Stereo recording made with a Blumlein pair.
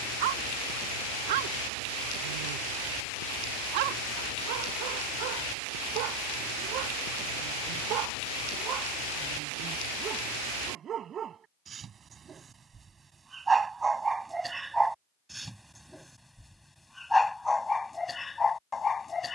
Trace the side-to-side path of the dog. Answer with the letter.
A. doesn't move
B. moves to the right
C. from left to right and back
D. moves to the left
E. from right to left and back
D.